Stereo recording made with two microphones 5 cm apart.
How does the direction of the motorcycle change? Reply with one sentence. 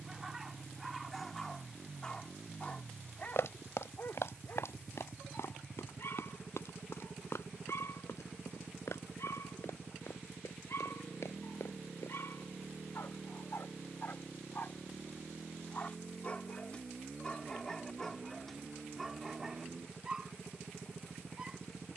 In this clip you hear the motorcycle stay in one place.